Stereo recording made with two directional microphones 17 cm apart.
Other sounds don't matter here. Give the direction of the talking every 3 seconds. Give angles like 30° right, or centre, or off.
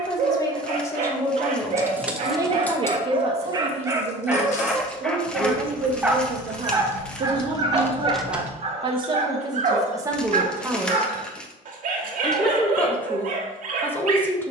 centre, 50° right, 40° right, 20° right, 10° left.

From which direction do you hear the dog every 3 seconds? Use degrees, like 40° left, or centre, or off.
50° right, 10° right, 30° right, 50° right, 50° right.